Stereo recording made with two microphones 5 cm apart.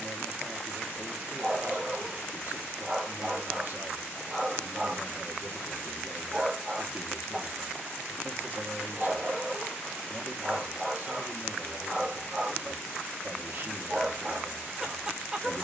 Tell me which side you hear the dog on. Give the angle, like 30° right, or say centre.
10° right.